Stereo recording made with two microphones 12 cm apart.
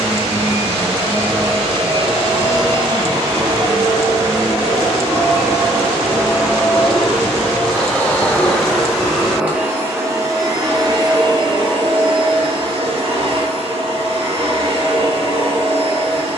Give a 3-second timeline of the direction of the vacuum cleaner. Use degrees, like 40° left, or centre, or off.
50° right, 30° right, centre, 30° right, 50° right, 50° right.